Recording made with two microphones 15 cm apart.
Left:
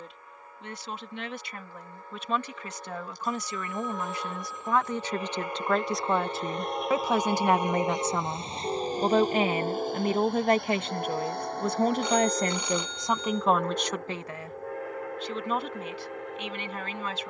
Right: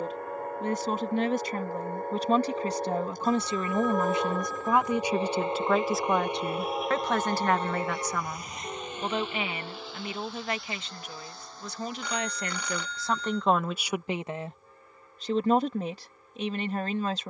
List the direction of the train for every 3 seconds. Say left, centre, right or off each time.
right, right, centre, left, left, left.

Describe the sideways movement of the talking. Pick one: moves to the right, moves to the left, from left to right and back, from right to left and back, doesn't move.
from right to left and back.